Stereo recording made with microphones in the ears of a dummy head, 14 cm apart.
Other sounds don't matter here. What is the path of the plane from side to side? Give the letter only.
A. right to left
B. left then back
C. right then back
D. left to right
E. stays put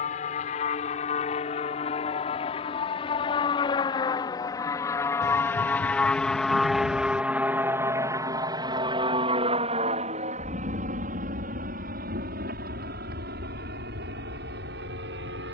D.